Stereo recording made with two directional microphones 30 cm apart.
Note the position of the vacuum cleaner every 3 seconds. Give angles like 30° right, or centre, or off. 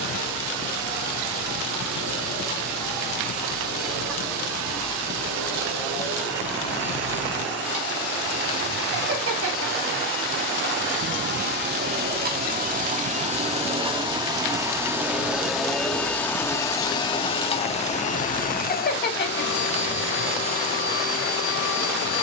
70° right, 60° right, 50° right, 40° right, 20° right, 10° left, 40° left, 50° left.